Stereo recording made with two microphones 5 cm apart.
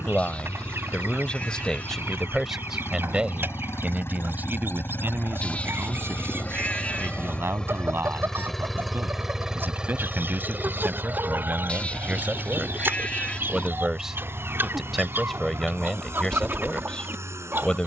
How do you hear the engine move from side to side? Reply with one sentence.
In this clip you hear the engine move to the right.